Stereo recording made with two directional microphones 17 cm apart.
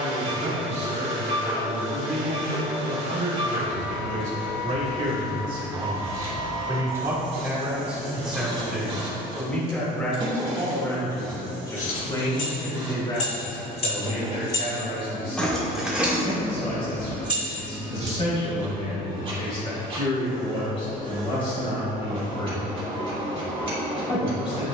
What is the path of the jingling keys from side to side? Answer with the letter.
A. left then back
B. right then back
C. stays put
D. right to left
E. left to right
E.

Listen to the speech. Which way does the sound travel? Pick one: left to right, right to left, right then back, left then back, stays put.
right to left.